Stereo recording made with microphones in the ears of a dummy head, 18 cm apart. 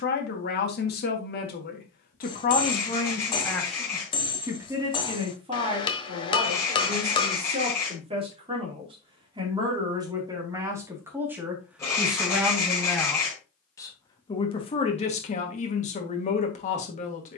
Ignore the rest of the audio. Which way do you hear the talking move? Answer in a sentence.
In this clip you hear the talking move from left to right and back again.